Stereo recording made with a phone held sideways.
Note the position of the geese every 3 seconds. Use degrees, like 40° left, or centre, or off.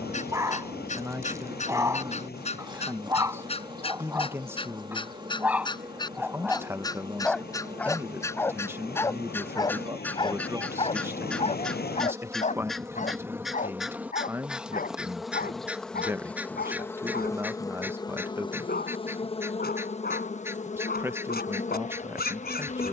50° left, 30° left, 20° left, 10° left, centre, 10° right, 10° right, 10° right.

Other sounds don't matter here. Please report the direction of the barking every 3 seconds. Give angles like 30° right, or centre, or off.
20° right, 10° right, centre, 40° left, 60° left, 70° left, 80° left, 80° left.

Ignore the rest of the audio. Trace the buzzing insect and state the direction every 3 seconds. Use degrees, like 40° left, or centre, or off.
30° right, 30° right, 30° right, 30° right, 10° right, 10° left, 40° left, 50° left.